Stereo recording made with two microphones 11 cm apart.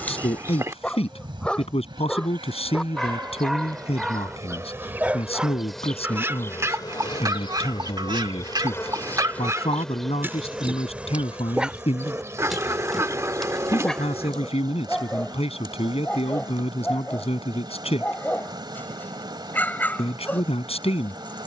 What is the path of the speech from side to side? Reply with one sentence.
In this clip you hear the speech stay put.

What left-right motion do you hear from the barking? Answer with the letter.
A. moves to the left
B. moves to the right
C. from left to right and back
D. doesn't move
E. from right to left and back
C.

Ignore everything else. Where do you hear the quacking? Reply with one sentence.
You can hear the quacking on the right.